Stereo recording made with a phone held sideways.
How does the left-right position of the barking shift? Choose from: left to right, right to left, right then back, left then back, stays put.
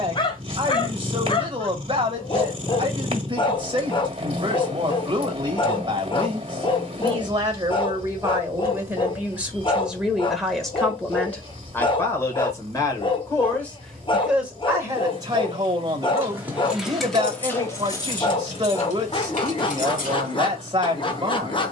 stays put.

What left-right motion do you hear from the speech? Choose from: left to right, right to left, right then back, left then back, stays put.
left then back.